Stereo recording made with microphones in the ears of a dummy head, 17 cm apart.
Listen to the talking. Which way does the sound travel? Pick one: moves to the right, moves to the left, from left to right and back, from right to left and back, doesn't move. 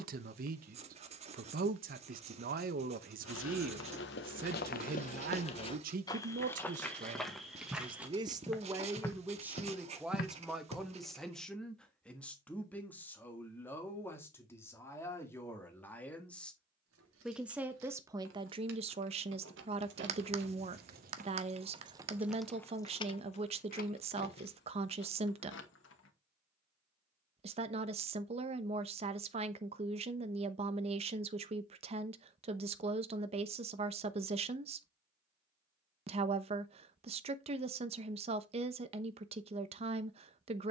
from right to left and back.